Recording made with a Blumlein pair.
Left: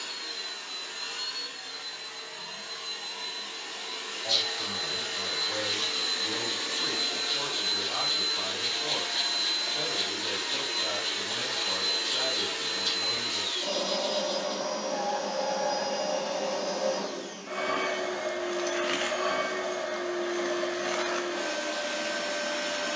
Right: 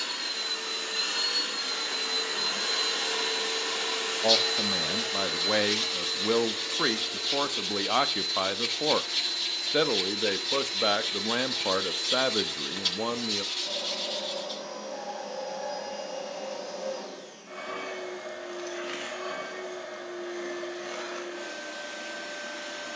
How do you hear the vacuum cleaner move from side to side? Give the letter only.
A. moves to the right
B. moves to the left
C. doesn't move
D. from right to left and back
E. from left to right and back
B.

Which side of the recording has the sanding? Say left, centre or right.
right.